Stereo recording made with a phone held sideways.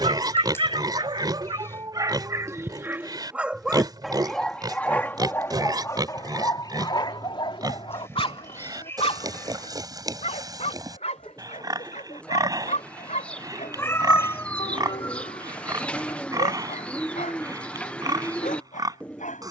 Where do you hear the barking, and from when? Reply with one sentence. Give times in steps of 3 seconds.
You can hear the barking on the right from 0 s, in the centre from 3 s and on the left from 6 s.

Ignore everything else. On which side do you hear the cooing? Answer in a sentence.
You can hear the cooing in the centre.